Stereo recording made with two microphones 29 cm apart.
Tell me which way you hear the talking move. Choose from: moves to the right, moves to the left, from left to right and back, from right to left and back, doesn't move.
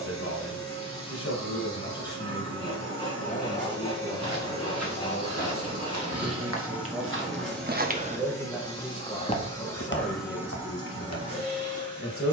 from left to right and back.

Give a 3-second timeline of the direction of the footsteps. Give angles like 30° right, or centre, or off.
off, 60° right, 40° right, 40° left.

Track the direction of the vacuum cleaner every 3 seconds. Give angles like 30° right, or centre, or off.
40° right, 30° right, centre, 10° right.